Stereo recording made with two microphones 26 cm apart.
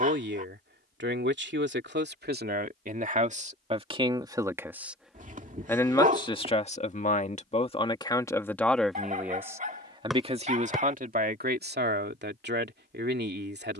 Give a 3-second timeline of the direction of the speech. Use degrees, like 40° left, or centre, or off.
40° right, 10° right, 20° left, 30° right, 40° right.